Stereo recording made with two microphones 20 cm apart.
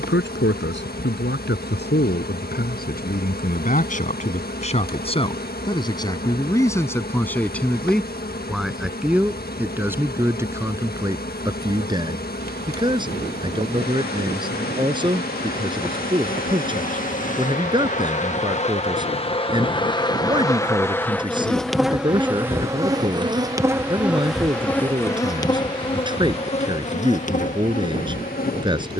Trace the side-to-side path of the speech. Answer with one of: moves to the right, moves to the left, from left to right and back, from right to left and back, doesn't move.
moves to the right.